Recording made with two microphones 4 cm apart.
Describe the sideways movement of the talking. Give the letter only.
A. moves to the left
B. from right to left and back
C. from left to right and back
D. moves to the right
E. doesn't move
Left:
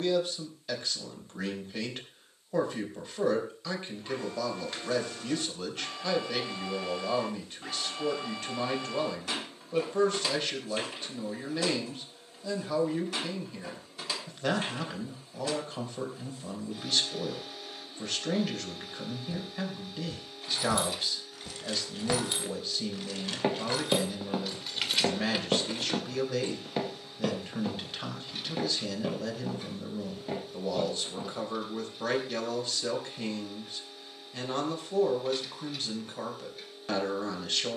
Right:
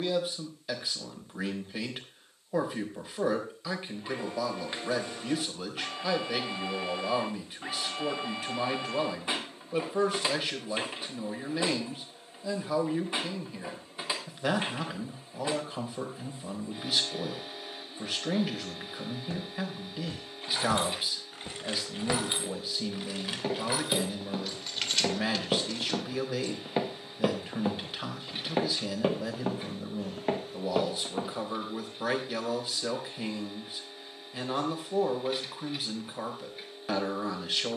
E.